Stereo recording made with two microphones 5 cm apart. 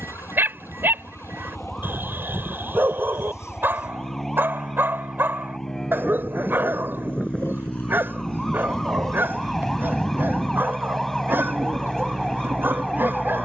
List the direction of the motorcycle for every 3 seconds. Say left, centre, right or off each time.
left, left, left, left, right.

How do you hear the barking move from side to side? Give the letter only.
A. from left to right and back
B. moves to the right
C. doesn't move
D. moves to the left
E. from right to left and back
C.